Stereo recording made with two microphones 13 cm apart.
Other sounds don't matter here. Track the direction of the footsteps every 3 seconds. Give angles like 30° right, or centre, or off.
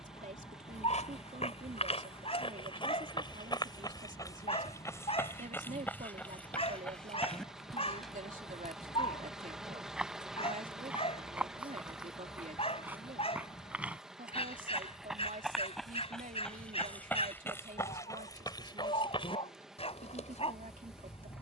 50° left, 20° left, 10° left, 10° right, 10° right, 10° left, 40° left.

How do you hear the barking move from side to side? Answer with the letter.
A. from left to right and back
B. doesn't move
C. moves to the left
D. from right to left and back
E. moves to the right
B.